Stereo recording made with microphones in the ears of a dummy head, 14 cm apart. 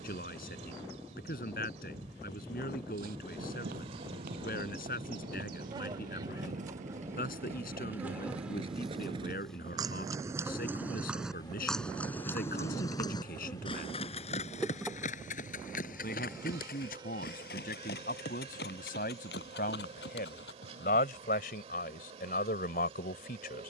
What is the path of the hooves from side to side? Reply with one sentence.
In this clip you hear the hooves travel towards the left.